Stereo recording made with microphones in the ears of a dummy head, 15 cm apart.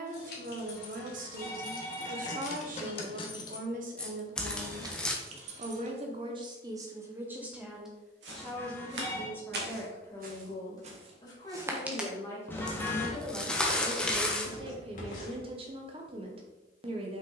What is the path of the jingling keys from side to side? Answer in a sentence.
You can hear the jingling keys move from left to right.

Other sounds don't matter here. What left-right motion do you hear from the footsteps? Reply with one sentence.
In this clip you hear the footsteps travel towards the left.